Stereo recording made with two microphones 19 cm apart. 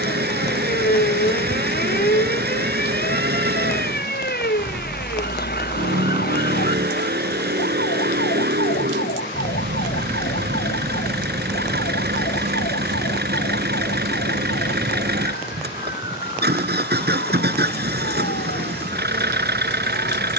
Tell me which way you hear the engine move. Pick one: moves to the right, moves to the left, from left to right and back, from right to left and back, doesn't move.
doesn't move.